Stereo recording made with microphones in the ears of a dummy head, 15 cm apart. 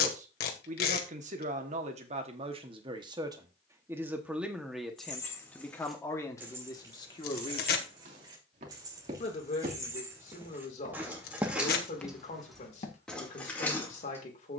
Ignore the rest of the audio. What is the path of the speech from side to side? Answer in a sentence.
In this clip you hear the speech move from right to left.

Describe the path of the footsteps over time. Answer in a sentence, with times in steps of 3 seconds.
You can hear the footsteps not at all from 0 s, on the right from 6 s and on the left from 12 s.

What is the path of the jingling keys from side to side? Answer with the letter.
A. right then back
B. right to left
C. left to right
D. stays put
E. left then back
A.